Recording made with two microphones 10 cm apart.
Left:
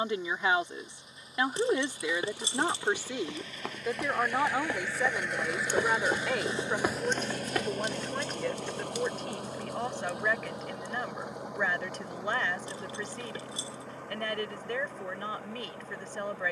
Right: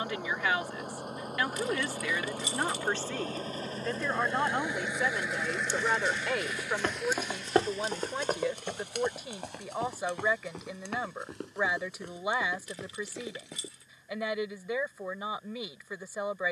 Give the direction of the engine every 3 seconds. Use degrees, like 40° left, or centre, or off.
60° right, 20° right, 40° left, 70° left, 80° left, 80° left.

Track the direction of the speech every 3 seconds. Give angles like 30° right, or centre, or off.
20° left, 10° left, centre, 10° right, 10° right, 10° right.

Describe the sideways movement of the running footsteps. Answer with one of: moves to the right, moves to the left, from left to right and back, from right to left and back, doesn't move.
moves to the right.